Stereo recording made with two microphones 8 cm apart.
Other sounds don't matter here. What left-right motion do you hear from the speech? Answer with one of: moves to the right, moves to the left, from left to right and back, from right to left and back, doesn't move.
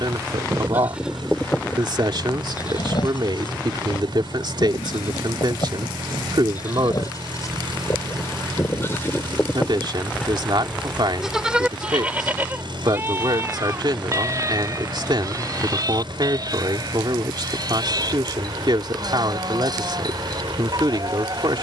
doesn't move.